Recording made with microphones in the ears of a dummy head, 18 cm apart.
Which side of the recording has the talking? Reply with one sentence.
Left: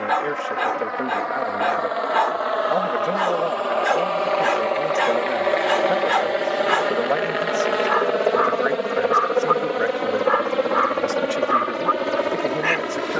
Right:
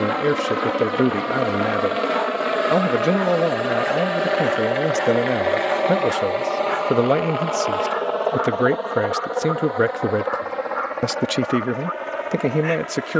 You can hear the talking on the right.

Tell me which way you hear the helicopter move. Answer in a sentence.
In this clip you hear the helicopter go from the right side to the left.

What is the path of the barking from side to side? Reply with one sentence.
You can hear the barking stay in one place.